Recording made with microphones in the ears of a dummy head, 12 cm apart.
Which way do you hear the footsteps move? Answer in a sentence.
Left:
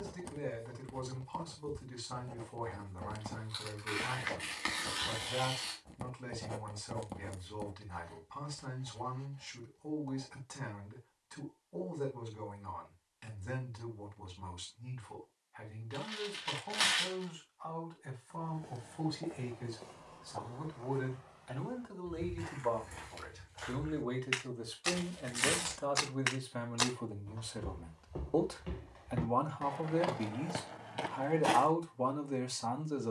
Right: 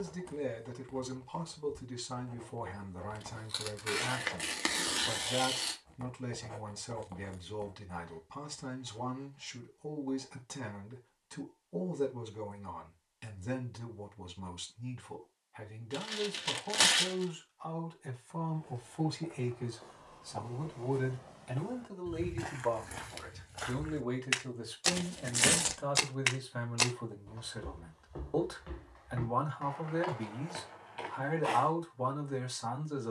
You can hear the footsteps go right and come back.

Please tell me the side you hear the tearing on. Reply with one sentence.
You can hear the tearing on the right.